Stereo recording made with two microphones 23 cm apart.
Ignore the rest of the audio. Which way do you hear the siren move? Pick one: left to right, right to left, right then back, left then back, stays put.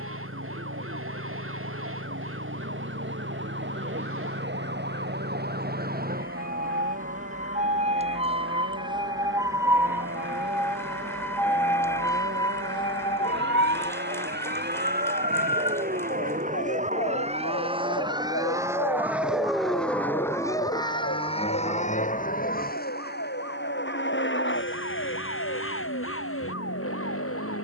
right to left.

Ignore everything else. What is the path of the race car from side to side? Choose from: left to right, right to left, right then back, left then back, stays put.
right to left.